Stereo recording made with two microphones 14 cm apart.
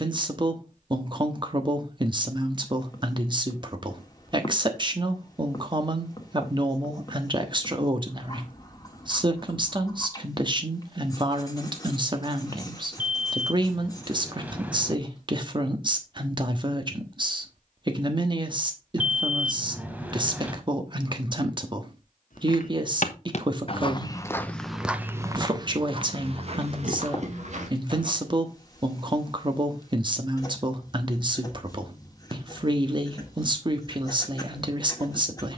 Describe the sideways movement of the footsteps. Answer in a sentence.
You can hear the footsteps go from the left side to the right.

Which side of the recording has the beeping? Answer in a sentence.
In this clip you hear the beeping in the centre.